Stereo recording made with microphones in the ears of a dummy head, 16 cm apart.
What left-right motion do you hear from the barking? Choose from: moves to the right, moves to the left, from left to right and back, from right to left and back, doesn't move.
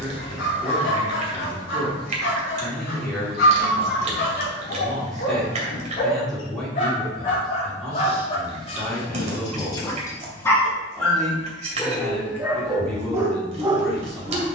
moves to the right.